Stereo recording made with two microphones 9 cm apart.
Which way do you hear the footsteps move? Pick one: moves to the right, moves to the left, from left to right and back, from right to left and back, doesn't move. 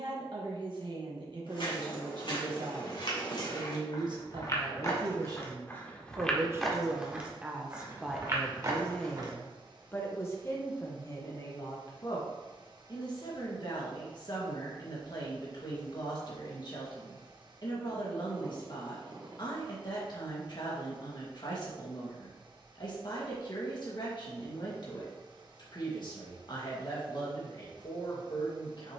moves to the right.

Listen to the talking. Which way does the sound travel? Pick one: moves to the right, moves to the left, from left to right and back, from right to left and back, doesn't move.
moves to the left.